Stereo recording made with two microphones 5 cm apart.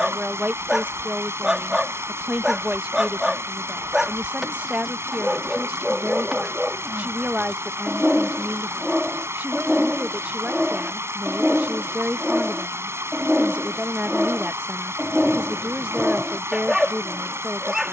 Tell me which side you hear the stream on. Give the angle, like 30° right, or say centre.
60° right.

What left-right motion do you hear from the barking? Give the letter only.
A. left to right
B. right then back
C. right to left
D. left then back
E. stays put
E.